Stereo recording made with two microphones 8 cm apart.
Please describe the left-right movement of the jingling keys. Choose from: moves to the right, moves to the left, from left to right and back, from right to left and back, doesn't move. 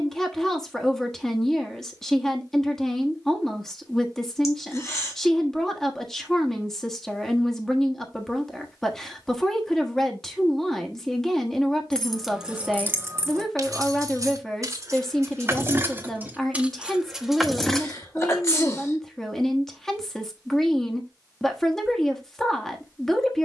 from left to right and back.